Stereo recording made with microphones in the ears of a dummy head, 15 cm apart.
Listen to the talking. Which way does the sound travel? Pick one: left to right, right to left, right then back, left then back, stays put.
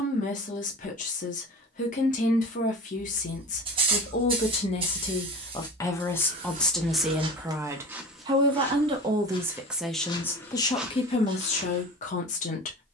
right then back.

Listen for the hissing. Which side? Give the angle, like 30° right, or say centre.
30° right.